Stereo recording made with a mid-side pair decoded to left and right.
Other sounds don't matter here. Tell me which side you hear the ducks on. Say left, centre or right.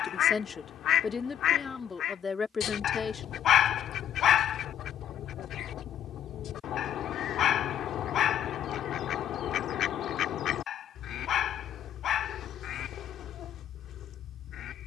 left.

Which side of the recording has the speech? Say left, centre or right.
left.